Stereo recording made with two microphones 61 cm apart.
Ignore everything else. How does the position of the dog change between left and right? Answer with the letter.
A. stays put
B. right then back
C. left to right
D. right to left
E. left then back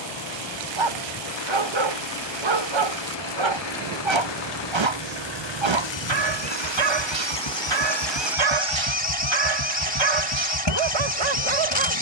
A.